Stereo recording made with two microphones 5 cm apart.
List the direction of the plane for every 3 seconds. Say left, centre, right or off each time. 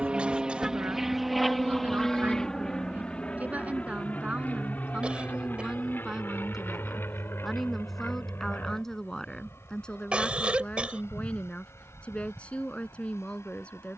centre, left, left, left, left.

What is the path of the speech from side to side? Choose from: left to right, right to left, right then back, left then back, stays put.
right to left.